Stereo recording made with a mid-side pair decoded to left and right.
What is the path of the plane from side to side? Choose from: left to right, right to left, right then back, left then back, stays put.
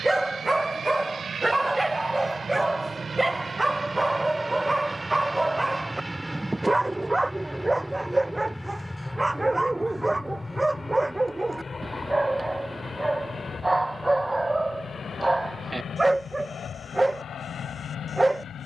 right to left.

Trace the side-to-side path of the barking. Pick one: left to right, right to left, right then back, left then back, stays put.
stays put.